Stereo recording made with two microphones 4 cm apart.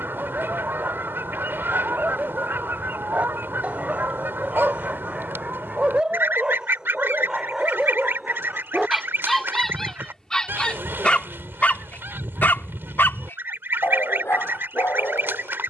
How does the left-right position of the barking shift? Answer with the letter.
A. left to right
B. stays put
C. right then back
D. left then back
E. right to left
E.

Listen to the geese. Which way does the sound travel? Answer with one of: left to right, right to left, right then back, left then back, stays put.
stays put.